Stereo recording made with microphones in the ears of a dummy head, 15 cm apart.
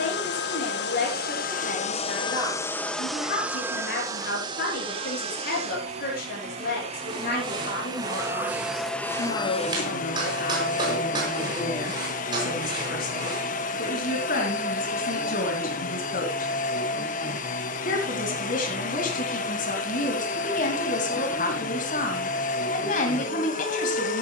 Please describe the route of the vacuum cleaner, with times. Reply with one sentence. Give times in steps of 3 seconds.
In this clip you hear the vacuum cleaner on the left from 0 s, on the right from 3 s and on the left from 9 s.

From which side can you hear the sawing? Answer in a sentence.
You can hear the sawing on the right.